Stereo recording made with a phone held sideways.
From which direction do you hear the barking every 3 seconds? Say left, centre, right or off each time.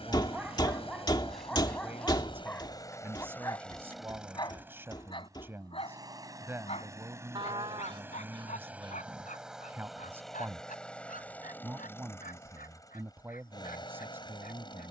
centre, left, left, left, left.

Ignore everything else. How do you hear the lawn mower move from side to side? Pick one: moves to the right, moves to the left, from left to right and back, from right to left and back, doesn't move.
from left to right and back.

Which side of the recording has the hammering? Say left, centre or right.
left.